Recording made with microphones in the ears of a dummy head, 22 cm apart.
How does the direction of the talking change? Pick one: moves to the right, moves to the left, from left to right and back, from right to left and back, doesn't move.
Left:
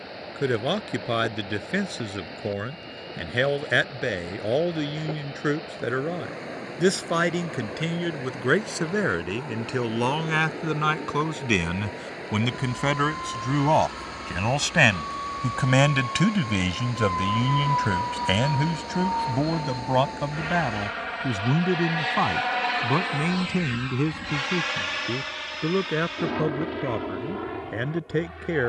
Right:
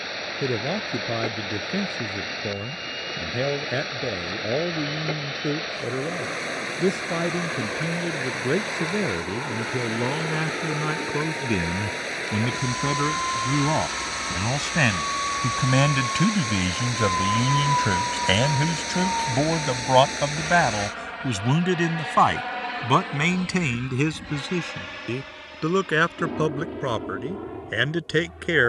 moves to the right.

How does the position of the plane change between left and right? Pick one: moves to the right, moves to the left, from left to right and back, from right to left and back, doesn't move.
moves to the left.